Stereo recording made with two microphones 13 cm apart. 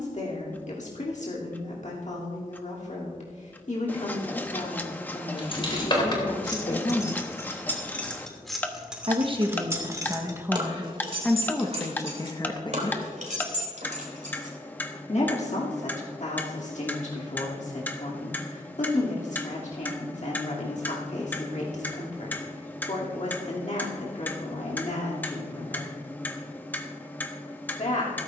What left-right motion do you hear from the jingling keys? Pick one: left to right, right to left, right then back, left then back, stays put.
left to right.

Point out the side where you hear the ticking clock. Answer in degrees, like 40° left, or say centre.
10° left.